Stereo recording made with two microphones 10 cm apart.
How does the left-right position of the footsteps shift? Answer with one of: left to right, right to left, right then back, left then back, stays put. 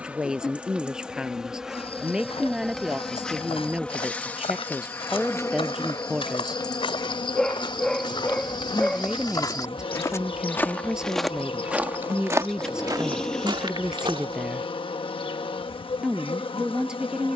left to right.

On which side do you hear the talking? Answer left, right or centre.
centre.